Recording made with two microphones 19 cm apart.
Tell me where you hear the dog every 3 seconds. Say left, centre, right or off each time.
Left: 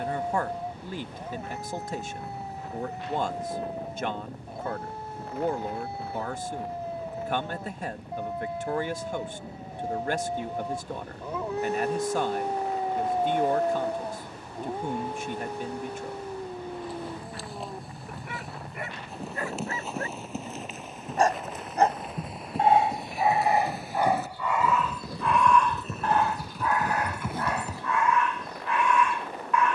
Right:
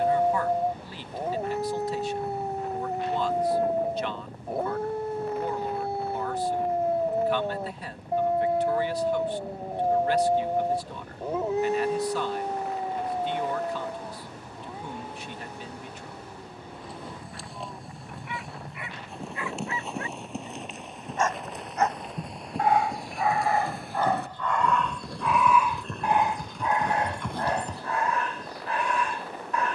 right, right, right, right, left, left, left, left, centre, right.